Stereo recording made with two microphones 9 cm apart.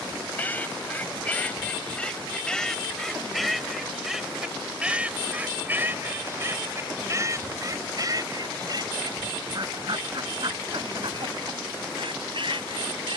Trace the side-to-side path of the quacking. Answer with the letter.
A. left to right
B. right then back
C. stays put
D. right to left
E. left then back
A.